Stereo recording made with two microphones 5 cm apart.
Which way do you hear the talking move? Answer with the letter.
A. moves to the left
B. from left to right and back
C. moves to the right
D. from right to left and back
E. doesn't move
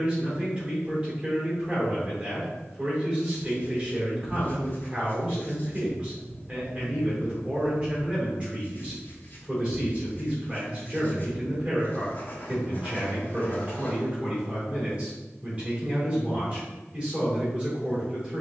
E.